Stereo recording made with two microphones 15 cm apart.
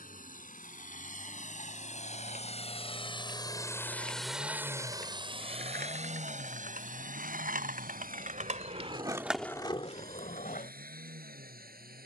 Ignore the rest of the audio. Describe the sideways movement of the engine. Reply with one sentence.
In this clip you hear the engine move from left to right.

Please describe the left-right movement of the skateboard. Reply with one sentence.
You can hear the skateboard move from right to left.